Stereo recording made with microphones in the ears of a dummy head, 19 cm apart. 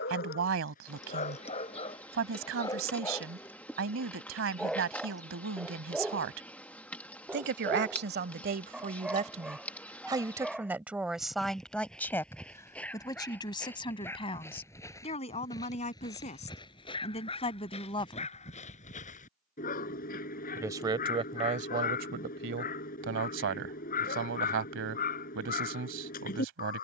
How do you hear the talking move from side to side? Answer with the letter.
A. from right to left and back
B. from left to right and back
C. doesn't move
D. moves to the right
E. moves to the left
A.